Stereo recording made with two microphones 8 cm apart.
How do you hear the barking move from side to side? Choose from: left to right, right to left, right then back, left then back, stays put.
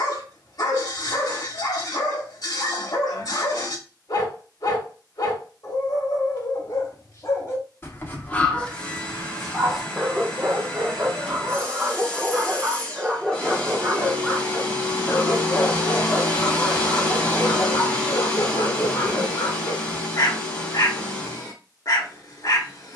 right then back.